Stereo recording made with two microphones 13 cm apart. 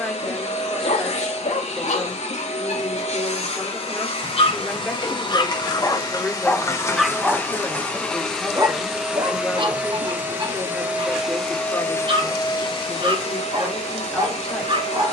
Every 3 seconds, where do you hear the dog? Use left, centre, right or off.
left, left, centre, right, right.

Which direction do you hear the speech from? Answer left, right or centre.
centre.